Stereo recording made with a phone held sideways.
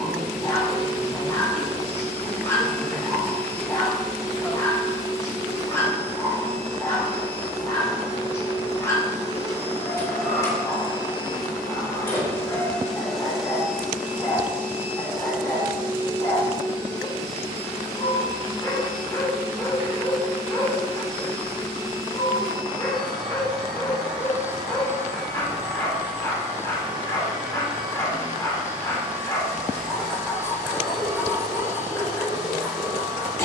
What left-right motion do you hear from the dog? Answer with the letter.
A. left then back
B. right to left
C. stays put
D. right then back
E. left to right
C.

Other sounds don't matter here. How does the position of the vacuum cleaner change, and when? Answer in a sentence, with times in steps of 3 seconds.
In this clip you hear the vacuum cleaner on the left from 0 s, in the centre from 12 s and on the right from 15 s.